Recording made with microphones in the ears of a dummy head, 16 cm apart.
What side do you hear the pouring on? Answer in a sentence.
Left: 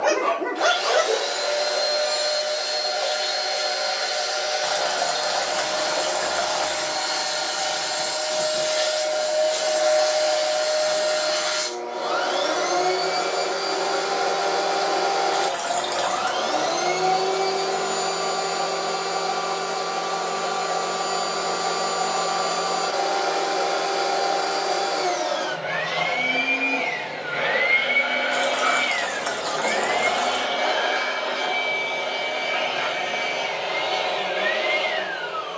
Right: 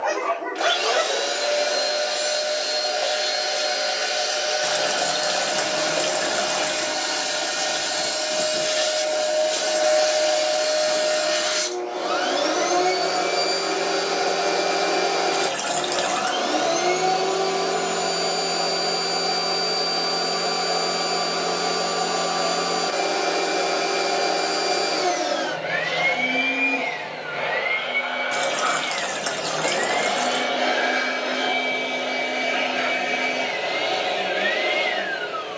You can hear the pouring on the right.